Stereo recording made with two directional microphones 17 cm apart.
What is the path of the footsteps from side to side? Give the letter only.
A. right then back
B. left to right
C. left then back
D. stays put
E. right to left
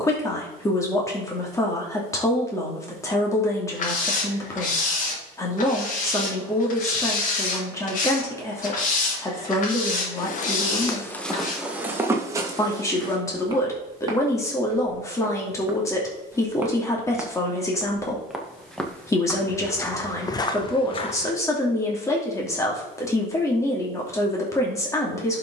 A.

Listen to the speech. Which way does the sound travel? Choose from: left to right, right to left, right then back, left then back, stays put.
stays put.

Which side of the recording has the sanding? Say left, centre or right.
left.